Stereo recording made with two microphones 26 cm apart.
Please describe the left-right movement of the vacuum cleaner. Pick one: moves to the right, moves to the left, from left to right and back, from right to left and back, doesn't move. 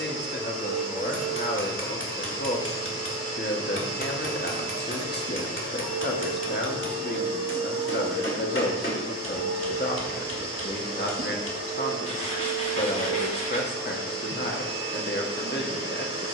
doesn't move.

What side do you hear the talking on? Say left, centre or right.
left.